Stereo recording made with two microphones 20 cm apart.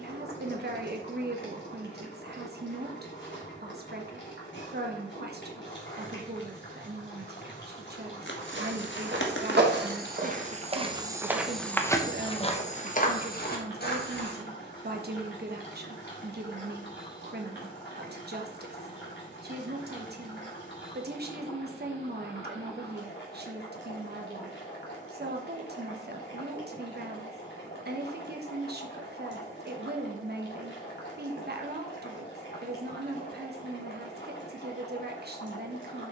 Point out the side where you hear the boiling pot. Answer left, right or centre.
left.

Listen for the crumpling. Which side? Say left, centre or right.
left.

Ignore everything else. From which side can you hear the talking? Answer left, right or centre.
right.